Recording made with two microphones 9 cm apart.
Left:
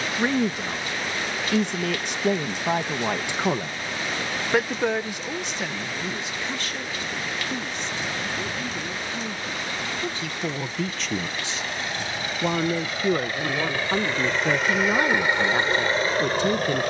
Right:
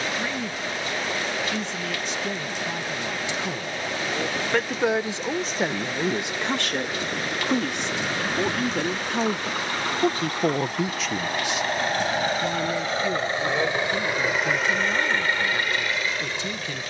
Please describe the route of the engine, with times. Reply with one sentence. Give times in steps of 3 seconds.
In this clip you hear the engine on the right from 0 s and on the left from 15 s.